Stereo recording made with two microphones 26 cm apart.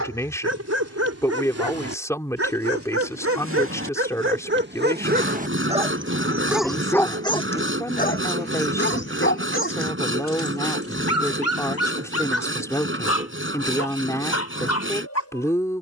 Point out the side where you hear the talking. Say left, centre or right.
centre.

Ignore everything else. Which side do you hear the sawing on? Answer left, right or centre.
right.